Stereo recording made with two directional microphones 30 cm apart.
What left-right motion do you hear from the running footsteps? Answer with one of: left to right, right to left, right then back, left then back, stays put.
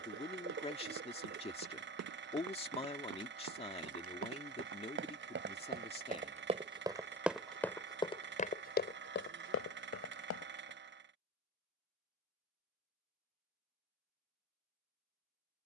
right to left.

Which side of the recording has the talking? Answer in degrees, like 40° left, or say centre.
20° left.